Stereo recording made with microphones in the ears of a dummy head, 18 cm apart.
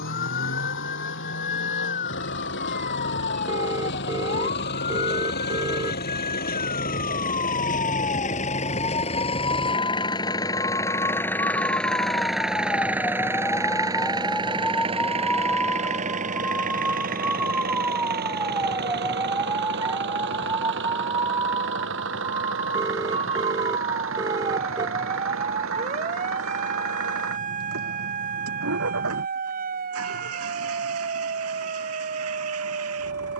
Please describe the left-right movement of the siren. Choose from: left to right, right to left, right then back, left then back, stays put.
left to right.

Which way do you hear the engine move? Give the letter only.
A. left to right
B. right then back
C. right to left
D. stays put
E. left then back
A.